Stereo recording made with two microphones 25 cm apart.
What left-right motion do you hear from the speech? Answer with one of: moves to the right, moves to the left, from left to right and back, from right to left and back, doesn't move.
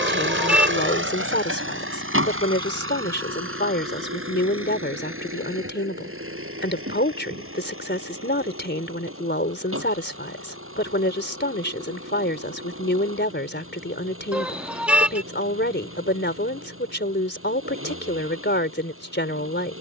doesn't move.